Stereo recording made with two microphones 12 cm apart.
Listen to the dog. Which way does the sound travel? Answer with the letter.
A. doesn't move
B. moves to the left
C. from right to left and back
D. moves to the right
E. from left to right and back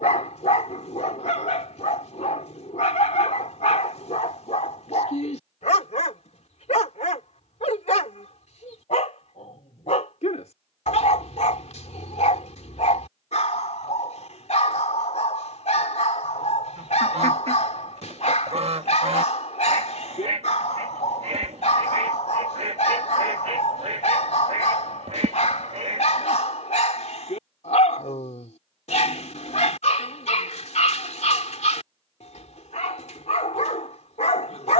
A.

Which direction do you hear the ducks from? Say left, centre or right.
right.